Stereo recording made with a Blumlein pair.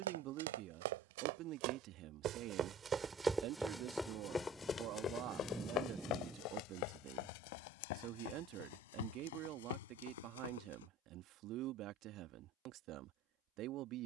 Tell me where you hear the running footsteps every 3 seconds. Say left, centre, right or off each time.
right, centre, left, left, off.